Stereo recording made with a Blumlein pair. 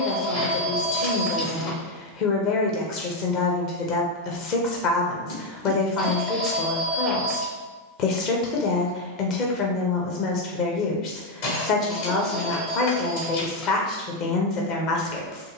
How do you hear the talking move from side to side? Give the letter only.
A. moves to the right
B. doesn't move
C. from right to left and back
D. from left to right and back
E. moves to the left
B.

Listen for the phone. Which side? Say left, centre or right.
left.